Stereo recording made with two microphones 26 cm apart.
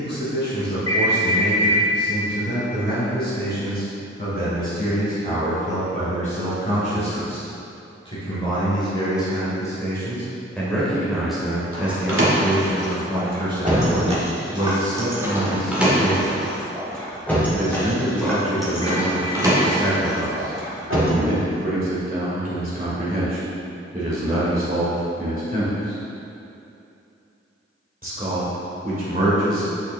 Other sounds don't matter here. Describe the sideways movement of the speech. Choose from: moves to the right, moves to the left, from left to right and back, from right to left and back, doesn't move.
moves to the right.